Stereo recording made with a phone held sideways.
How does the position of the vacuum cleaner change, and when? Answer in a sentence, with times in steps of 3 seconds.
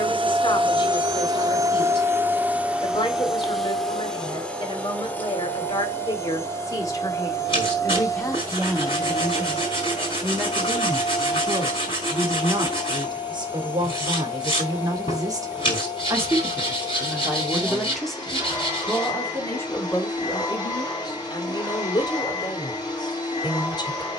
In this clip you hear the vacuum cleaner on the right from 0 s, in the centre from 3 s and on the left from 6 s.